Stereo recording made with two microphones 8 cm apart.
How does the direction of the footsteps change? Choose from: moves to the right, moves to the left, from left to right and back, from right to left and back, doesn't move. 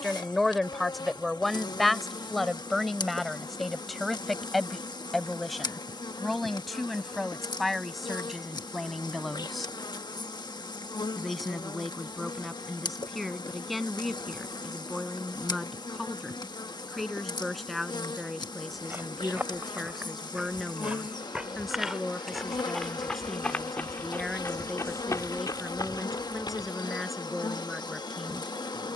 moves to the left.